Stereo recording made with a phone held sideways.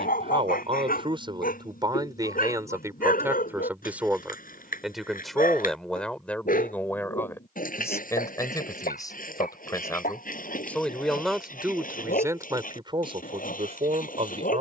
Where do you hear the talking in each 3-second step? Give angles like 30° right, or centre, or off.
30° right, centre, 10° left, 10° left, 30° right.